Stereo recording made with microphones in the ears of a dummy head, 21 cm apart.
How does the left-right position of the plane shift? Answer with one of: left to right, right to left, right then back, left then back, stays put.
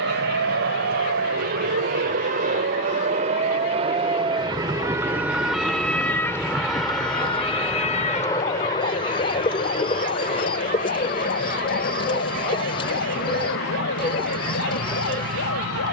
right to left.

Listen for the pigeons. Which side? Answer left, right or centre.
left.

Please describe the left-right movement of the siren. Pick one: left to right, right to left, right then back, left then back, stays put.
right to left.